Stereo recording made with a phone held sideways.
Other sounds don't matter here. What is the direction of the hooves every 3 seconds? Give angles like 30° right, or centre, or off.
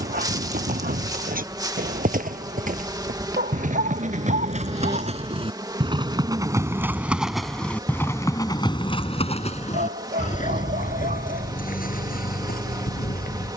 60° right, 50° right, centre, 50° left, 70° left.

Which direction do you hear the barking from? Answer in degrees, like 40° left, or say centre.
80° right.